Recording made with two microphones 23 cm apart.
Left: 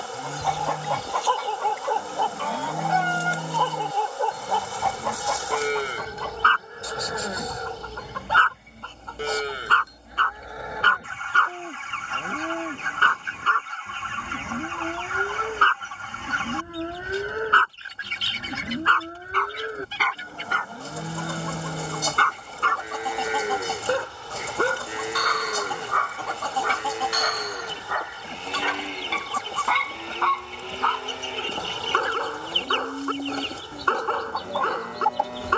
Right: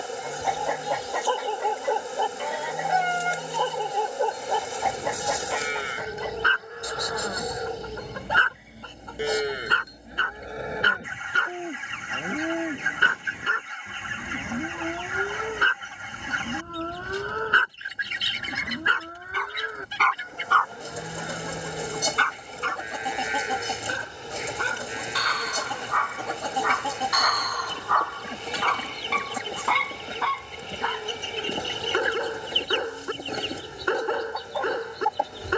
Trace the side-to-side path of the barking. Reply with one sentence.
You can hear the barking move from right to left and back again.